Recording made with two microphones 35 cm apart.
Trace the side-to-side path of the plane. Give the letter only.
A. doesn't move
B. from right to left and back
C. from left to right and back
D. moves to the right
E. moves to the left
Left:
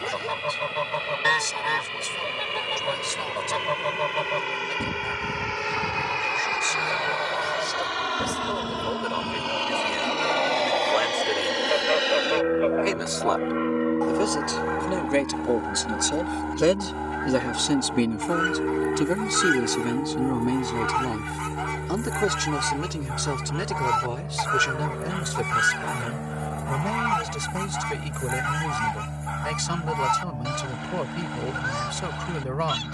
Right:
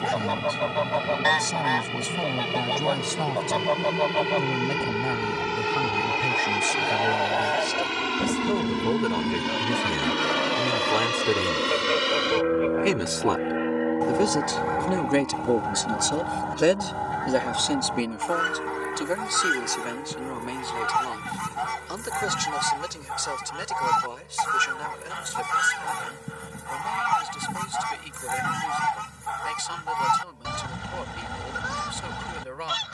E.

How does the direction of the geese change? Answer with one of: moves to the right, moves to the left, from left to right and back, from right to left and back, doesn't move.
moves to the right.